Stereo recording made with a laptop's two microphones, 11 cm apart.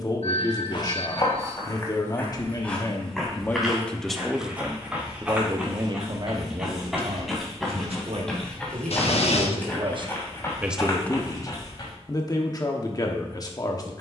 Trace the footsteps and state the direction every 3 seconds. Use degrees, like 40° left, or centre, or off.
30° left, 10° right, centre, 30° left, off.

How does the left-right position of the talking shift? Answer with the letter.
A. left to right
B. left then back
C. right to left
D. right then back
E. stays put
D.